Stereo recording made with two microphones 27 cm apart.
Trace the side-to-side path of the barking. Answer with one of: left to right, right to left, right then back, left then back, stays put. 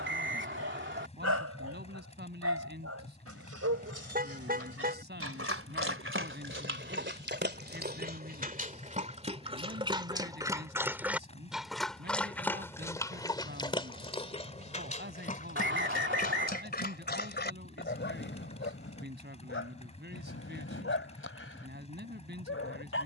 right to left.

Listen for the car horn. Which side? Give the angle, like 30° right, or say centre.
30° right.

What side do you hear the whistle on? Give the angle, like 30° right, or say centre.
40° right.